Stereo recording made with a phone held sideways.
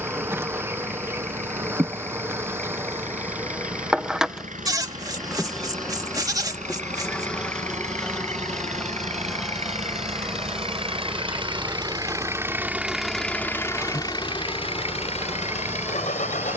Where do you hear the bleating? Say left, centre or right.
right.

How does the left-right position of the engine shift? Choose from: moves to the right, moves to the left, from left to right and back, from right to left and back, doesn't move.
moves to the left.